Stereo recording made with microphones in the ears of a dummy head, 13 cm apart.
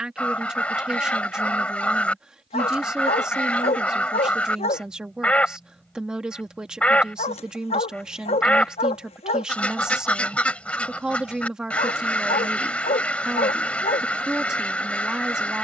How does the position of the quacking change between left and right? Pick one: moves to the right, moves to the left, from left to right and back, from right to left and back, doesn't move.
doesn't move.